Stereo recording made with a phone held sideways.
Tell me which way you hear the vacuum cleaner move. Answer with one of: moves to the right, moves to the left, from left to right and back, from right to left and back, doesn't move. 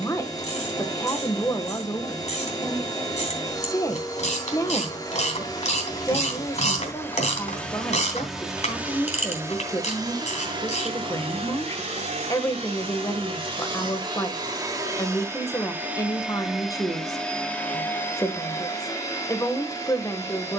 from left to right and back.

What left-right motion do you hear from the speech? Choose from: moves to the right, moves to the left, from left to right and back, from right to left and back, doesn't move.
doesn't move.